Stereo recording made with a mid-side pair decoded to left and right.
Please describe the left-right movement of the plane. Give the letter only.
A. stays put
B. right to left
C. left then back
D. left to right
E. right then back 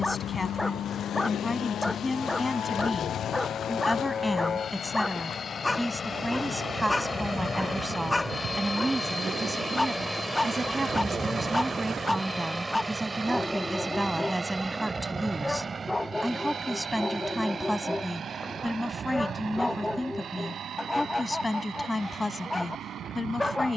D.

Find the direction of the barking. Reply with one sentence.
You can hear the barking in the centre.